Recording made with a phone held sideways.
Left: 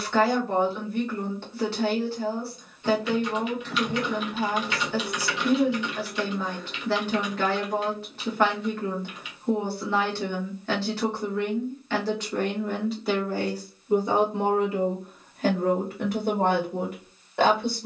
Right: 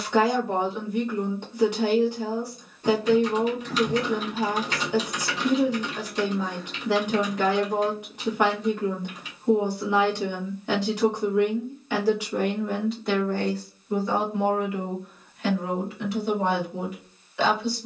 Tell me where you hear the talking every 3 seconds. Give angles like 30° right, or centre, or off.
10° right, 10° right, 10° right, 10° right, 10° left, 50° left.